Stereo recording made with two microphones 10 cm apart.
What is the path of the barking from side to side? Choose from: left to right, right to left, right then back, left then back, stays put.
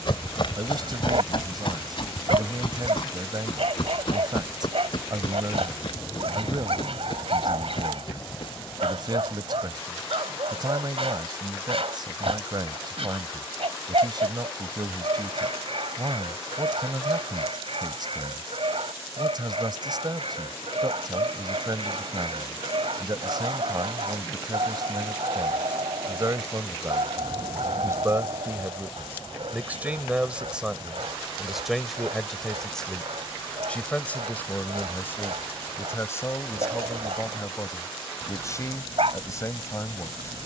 stays put.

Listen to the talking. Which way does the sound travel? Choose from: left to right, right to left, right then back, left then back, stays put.
right to left.